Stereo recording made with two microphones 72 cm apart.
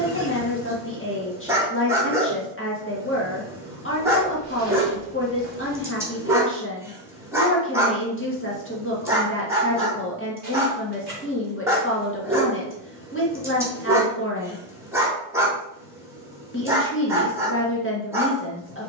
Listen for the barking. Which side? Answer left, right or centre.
centre.